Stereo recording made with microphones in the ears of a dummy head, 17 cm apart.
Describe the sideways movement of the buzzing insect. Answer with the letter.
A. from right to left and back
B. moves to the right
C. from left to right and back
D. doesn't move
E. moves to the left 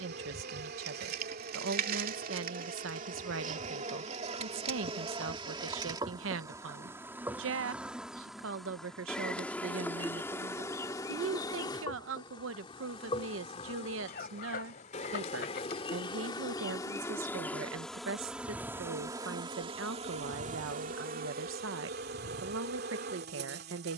A.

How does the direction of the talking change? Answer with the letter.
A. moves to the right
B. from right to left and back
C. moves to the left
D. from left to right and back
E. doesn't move
E.